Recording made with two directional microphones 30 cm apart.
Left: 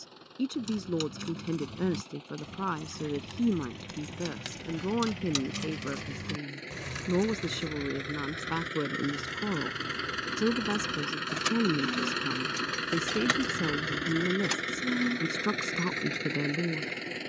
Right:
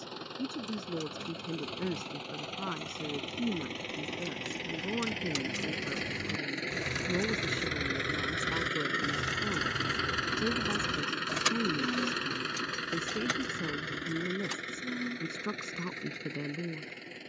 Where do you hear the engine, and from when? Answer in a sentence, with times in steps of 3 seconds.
You can hear the engine on the right from 0 s, in the centre from 9 s and on the left from 12 s.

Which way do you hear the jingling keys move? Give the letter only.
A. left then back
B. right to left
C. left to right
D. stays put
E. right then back
E.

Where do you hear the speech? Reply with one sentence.
In this clip you hear the speech on the left.